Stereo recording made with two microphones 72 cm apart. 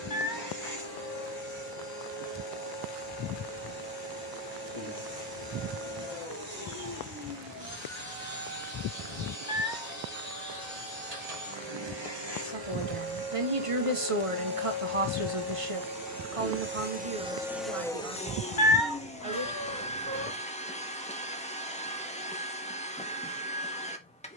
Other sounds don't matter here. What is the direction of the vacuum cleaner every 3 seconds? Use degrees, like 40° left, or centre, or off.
60° right, 60° right, 60° right, 60° right, 50° right, 20° right, 10° left, 10° left.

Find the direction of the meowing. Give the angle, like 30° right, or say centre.
90° left.